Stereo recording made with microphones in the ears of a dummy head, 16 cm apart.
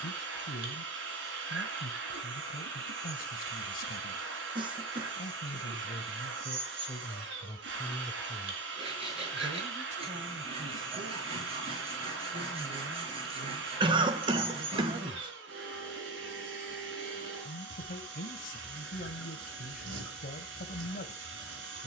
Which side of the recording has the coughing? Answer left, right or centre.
right.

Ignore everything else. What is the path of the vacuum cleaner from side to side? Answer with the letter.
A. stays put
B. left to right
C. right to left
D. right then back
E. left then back
A.